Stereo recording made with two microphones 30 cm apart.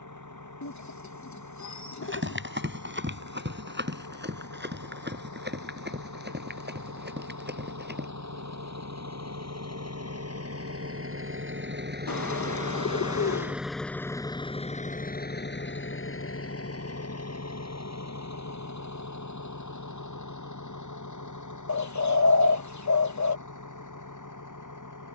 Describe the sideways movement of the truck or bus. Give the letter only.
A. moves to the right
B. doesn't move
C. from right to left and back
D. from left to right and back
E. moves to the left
E.